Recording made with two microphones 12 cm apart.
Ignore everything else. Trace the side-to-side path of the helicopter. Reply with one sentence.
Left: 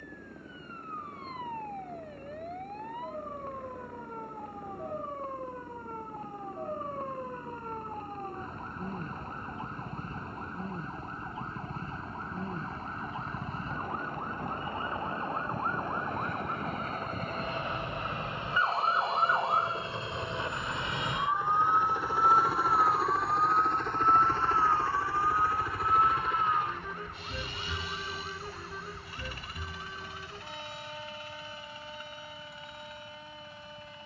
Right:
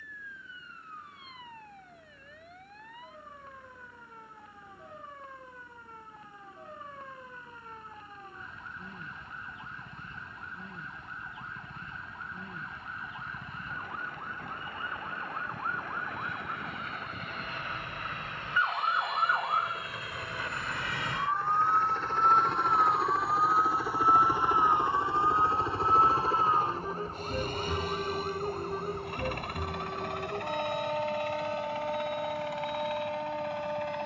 In this clip you hear the helicopter move to the right.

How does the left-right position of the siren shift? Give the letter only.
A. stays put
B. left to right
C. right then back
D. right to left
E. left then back
B.